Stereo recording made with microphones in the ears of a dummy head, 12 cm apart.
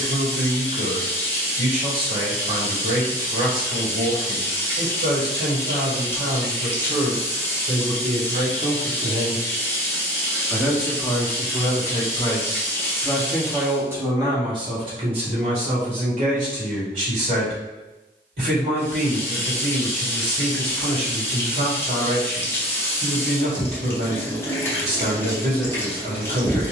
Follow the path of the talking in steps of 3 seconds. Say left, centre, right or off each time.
right, right, right, centre, centre, right, right, right, right.